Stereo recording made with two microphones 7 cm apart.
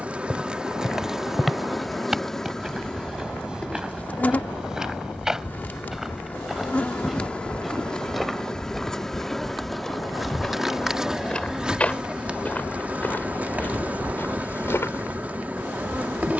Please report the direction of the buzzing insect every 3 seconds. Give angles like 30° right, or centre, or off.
centre, 20° left, 10° left, 10° right, 20° right, 20° right.